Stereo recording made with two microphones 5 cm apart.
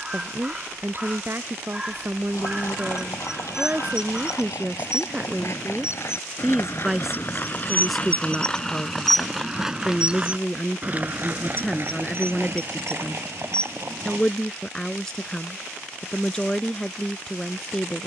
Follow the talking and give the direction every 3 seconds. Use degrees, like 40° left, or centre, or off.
40° right, 30° right, centre, 10° left, 10° left, 10° left.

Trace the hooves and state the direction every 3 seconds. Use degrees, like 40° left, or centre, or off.
70° left, 70° left, 30° left, 20° right, 50° right, off.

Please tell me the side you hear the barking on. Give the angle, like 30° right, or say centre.
20° right.